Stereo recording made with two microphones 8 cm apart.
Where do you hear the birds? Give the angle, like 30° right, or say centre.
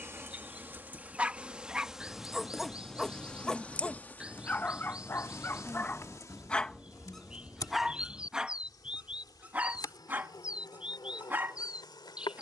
10° right.